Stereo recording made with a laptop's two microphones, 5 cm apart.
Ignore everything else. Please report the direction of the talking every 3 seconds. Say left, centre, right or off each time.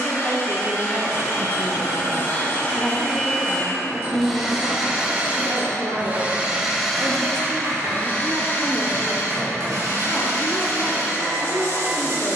left, right, right, left.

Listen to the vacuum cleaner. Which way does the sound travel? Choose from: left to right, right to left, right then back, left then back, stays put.
right then back.